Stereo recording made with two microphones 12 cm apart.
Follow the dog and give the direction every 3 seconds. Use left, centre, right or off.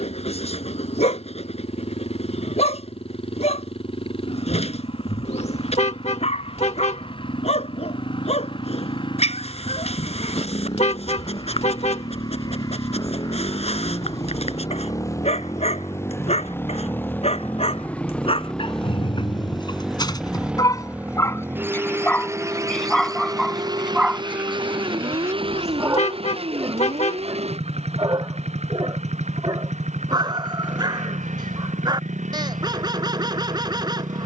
left, left, left, left, left, left, left, centre, right, right, right, right.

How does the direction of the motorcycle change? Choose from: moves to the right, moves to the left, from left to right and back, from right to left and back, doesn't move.
moves to the right.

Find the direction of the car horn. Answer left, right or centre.
left.